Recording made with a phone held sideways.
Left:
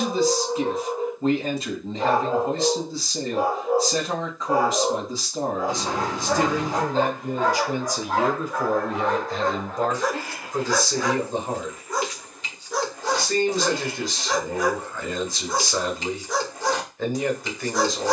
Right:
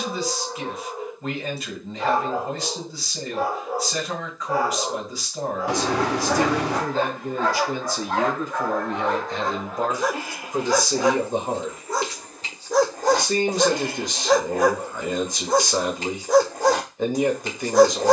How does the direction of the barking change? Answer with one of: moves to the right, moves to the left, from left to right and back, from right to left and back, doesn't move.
moves to the right.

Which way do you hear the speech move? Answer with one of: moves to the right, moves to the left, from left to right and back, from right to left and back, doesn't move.
moves to the right.